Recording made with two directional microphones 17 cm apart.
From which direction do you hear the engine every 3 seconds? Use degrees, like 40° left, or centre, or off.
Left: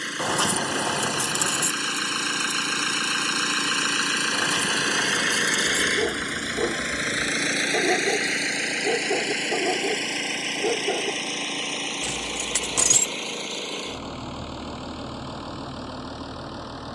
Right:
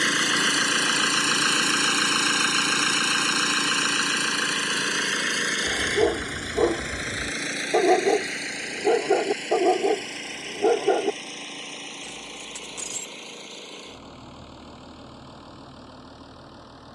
30° right, centre, 30° left, 40° left, 50° left, 50° left.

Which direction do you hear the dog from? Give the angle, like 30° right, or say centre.
40° right.